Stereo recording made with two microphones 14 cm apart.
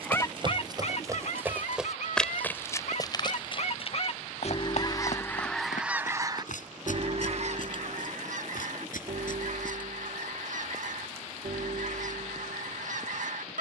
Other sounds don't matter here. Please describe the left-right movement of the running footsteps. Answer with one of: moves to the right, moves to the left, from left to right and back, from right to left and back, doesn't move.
moves to the left.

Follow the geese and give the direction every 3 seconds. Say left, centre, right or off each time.
left, left, right, right, right.